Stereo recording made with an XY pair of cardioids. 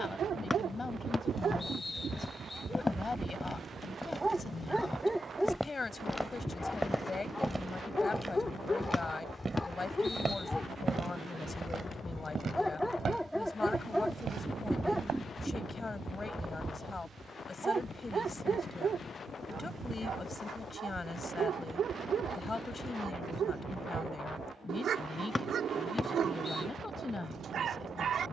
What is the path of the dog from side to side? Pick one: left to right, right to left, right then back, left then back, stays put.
left then back.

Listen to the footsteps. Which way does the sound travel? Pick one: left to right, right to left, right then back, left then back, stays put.
left to right.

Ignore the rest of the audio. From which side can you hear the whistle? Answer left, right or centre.
left.